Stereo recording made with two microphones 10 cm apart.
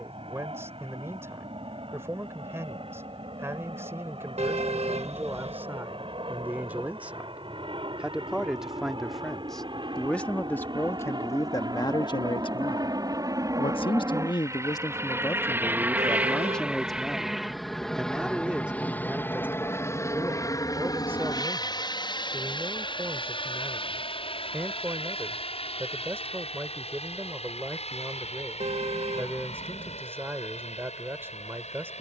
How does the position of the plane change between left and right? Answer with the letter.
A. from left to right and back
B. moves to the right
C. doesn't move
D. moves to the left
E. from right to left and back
D.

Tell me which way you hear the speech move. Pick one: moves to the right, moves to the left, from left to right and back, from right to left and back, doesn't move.
from right to left and back.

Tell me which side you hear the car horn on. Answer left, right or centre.
right.